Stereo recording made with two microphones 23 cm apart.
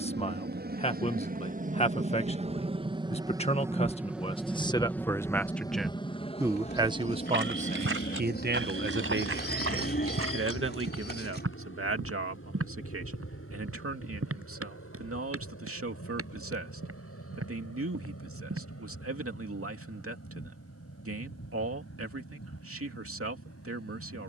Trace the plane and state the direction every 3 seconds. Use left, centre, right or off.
right, centre, left, left, left, left, left, left.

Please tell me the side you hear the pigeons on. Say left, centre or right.
left.